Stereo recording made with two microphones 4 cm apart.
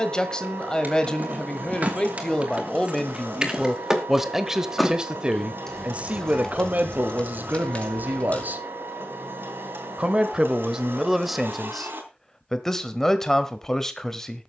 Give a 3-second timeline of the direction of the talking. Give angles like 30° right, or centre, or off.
20° left, 10° right, 50° right, 10° right, 10° left.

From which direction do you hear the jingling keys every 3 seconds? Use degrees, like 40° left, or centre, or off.
40° right, 10° right, 30° left, off, off.